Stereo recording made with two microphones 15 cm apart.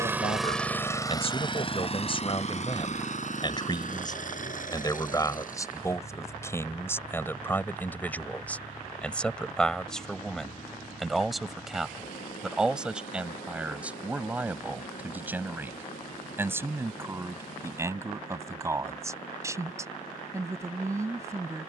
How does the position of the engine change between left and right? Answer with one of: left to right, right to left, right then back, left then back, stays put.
right to left.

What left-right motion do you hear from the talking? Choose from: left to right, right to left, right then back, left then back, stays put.
left to right.